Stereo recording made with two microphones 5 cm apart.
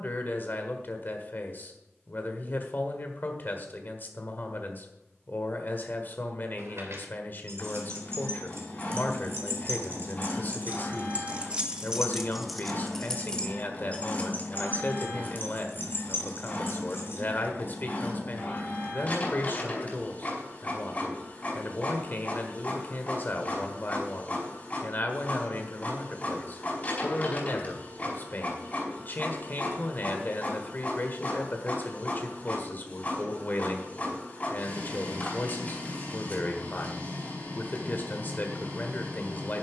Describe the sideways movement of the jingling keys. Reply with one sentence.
You can hear the jingling keys move to the left.